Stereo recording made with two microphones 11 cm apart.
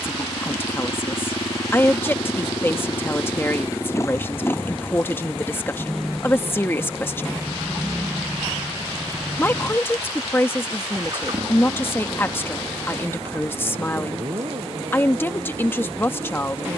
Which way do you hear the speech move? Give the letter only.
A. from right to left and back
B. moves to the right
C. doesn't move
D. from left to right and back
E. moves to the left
C.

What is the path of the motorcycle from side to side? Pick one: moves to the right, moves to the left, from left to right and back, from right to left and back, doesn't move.
moves to the right.